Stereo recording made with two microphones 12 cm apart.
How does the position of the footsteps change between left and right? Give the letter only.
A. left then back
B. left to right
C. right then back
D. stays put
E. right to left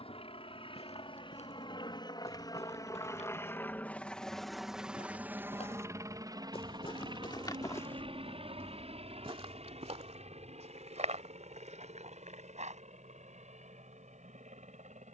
B.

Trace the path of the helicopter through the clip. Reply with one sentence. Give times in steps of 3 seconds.
You can hear the helicopter on the left from 0 s, in the centre from 3 s and on the right from 6 s.